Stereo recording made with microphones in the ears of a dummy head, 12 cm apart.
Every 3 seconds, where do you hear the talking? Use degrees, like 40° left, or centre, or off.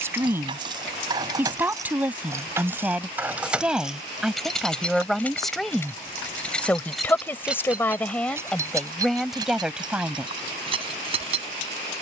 10° right, centre, 10° left, centre.